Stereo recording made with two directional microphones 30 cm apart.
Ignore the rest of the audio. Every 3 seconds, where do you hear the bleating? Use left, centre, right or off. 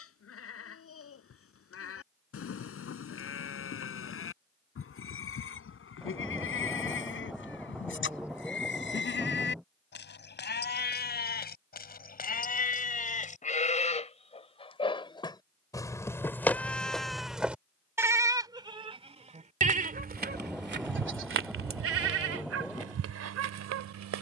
left, left, left, left, left, centre, right, right.